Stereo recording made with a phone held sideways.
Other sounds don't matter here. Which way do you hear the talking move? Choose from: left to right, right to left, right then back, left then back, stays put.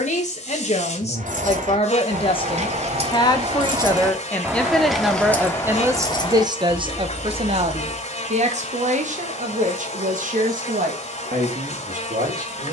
left to right.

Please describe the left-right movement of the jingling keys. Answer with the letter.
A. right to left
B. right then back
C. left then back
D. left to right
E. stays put
A.